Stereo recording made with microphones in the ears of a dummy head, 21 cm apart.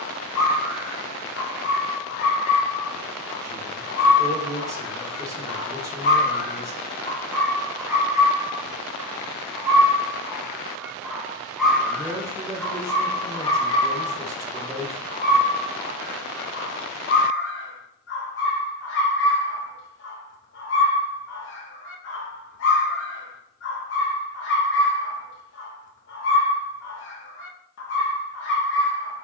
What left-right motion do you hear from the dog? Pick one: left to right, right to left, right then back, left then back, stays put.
right then back.